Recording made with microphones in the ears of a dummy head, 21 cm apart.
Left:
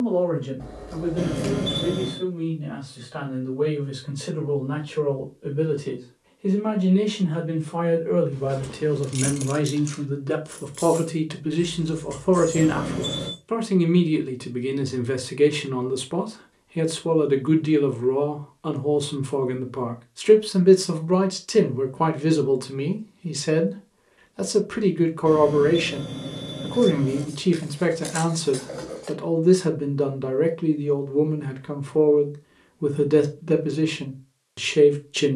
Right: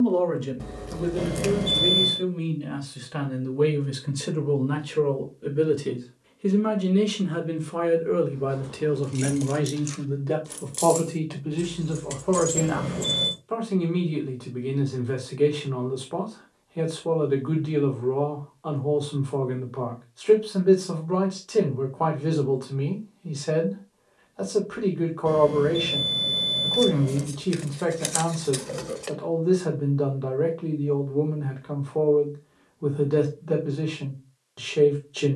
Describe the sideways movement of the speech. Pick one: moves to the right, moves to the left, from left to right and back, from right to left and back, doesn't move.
moves to the left.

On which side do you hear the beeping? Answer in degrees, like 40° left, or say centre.
centre.